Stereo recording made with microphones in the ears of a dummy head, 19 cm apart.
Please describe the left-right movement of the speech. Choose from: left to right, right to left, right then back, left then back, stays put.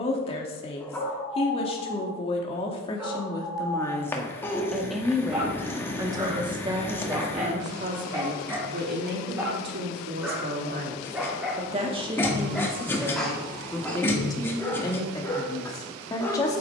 right then back.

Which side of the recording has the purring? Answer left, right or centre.
centre.